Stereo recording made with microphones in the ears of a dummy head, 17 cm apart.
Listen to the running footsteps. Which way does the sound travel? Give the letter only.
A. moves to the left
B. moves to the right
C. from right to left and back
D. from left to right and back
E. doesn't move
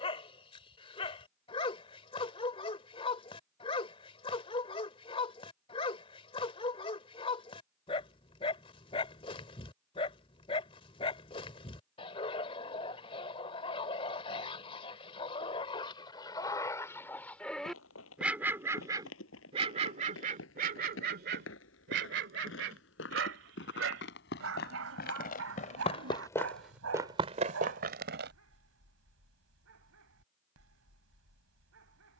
B.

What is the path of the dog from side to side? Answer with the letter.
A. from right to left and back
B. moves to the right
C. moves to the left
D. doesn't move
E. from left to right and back
B.